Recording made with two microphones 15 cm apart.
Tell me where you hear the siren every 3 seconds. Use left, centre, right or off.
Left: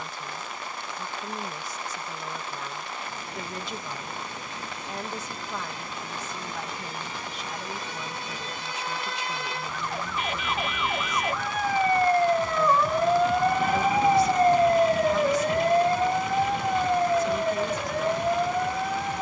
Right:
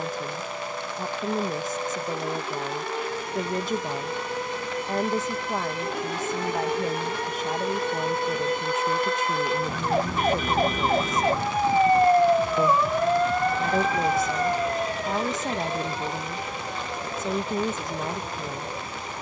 right, right, right, right, centre, left, left.